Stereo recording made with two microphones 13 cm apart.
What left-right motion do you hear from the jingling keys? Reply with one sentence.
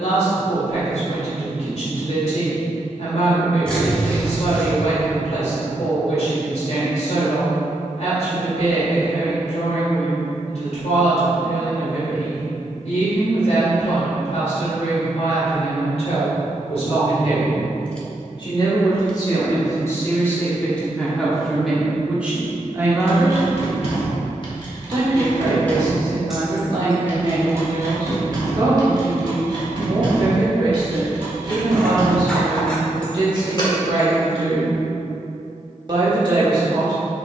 In this clip you hear the jingling keys go right and come back.